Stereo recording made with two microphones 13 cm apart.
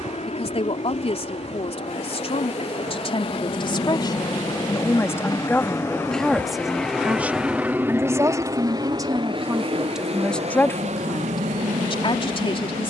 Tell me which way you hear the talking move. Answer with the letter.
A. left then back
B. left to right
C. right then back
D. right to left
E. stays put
C.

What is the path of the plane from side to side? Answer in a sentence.
In this clip you hear the plane go from the left side to the right.